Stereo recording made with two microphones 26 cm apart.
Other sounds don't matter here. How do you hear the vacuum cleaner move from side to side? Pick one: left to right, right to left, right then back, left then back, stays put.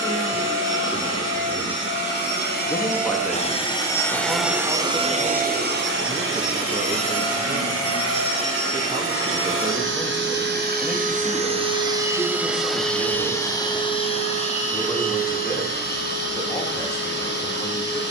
right then back.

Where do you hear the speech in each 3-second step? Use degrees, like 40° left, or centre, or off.
10° left, 10° right, 30° right, 10° right, 10° left, 10° left.